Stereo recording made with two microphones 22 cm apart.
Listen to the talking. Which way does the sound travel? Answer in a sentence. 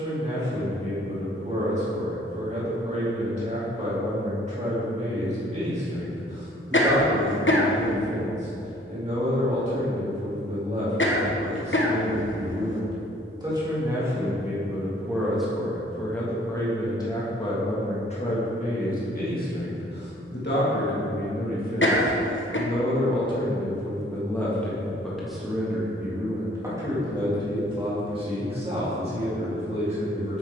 In this clip you hear the talking go left and come back.